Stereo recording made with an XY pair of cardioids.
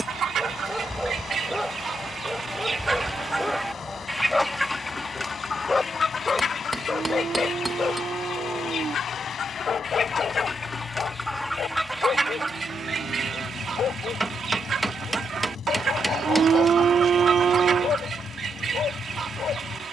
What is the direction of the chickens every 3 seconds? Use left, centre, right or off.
right, centre, left, left, right, right, right.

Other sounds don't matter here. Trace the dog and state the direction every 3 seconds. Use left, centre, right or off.
centre, centre, left, left, left, left, left.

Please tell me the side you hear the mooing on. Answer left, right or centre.
right.